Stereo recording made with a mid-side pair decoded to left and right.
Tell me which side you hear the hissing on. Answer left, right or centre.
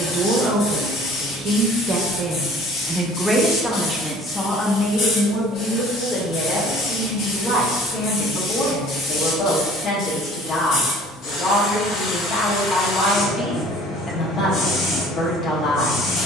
left.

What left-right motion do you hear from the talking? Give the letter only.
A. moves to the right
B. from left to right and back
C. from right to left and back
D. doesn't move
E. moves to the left
E.